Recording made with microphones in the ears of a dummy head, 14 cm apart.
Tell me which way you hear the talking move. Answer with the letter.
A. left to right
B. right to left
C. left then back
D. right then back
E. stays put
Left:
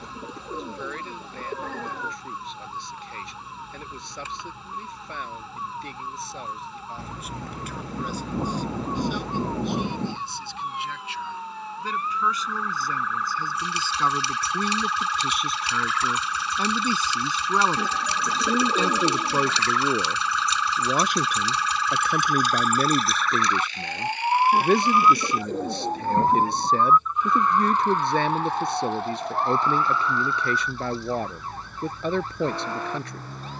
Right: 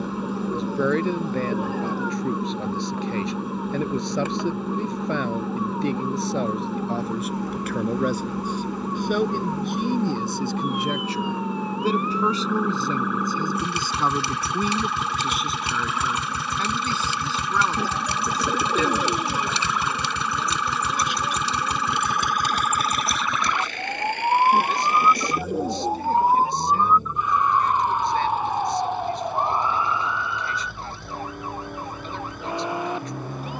B.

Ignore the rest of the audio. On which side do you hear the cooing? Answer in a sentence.
In this clip you hear the cooing in the centre.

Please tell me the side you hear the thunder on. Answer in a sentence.
You can hear the thunder on the left.